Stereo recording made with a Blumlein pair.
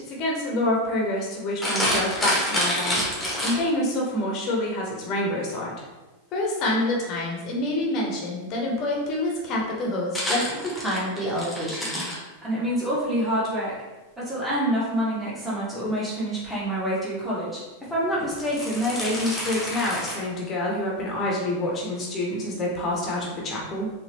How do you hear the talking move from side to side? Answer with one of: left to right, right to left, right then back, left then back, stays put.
right then back.